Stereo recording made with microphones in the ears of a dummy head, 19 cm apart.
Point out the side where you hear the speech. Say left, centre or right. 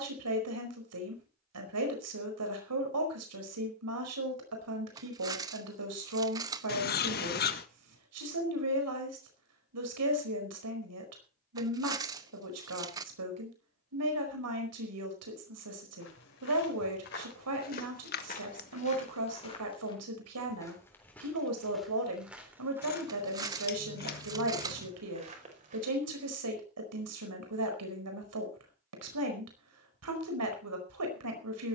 right.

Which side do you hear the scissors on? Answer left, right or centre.
left.